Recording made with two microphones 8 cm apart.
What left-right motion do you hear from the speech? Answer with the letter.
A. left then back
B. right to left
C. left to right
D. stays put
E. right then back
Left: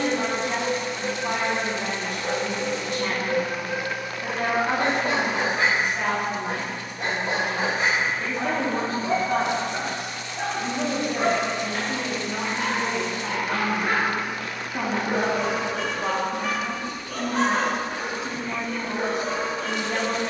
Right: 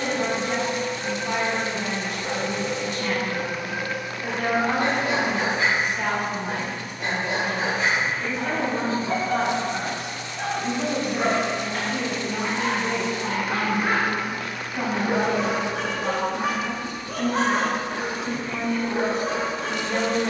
D.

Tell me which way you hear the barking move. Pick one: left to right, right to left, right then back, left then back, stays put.
left to right.